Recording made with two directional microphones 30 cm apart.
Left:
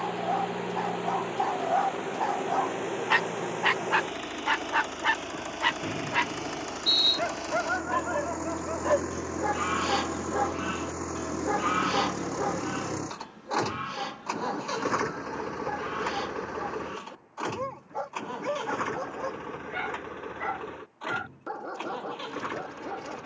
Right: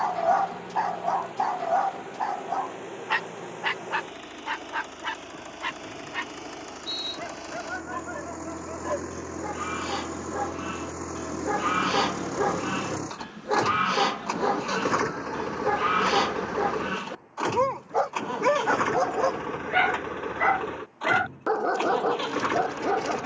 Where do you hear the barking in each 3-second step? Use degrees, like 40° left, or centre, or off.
20° right, 30° left, 40° left, 10° left, 40° right, 60° right, 60° right, 60° right.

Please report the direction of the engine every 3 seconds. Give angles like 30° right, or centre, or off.
50° left, 40° left, 30° left, 10° left, 10° right, 30° right, 40° right, 50° right.